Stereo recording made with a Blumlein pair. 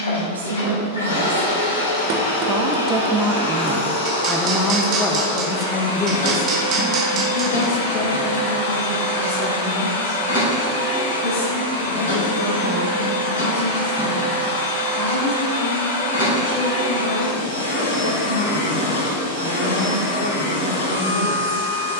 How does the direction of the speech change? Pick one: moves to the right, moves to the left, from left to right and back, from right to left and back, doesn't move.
moves to the left.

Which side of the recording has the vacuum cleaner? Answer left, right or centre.
left.